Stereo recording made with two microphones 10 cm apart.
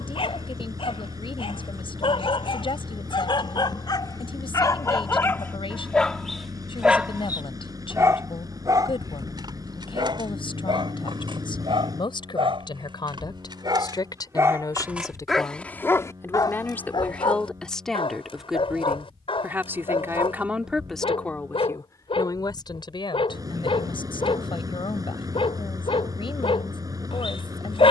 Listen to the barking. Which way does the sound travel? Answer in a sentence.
You can hear the barking move from left to right and back again.